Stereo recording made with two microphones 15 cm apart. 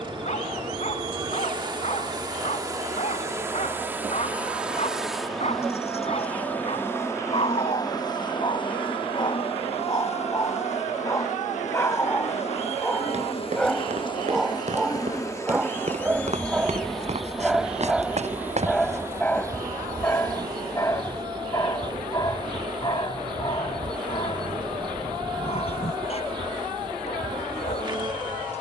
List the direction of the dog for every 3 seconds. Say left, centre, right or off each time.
left, left, left, left, centre, centre, centre, left, left, left.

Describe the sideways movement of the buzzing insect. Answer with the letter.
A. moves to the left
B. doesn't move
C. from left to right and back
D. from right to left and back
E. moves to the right
D.